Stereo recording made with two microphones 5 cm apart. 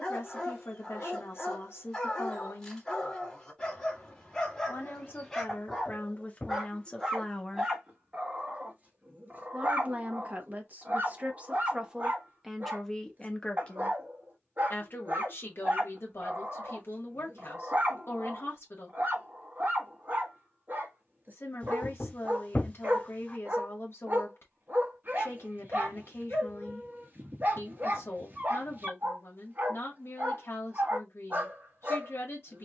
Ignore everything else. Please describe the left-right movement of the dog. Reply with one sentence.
You can hear the dog go from the left side to the right.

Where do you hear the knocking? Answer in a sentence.
You can hear the knocking on the left.